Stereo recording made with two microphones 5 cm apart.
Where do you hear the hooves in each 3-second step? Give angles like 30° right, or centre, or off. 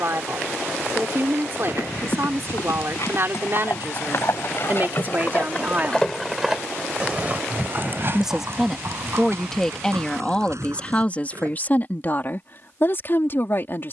70° left, 50° left, 30° right, 60° right, off.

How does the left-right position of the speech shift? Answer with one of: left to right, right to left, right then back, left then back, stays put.
right to left.